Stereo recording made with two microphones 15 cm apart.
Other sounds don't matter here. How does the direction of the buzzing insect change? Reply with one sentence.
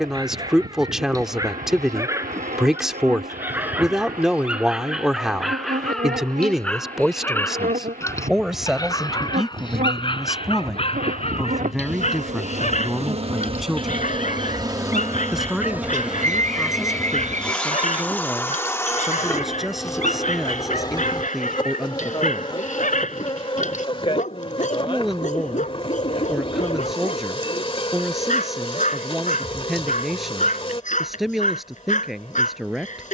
In this clip you hear the buzzing insect move from right to left.